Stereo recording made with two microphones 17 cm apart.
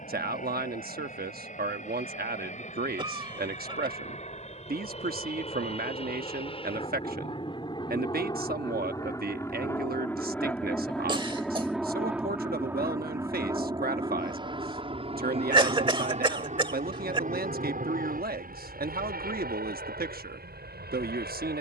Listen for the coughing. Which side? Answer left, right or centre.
right.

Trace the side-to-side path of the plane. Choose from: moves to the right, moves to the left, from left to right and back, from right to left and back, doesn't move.
moves to the right.